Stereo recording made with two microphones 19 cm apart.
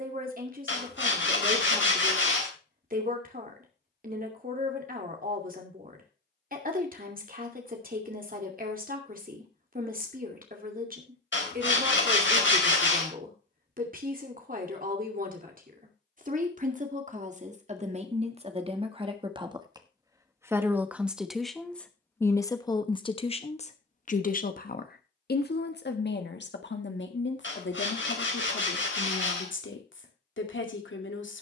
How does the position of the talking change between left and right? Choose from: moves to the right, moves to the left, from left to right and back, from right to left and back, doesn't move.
moves to the left.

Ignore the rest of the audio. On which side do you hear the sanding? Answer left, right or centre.
left.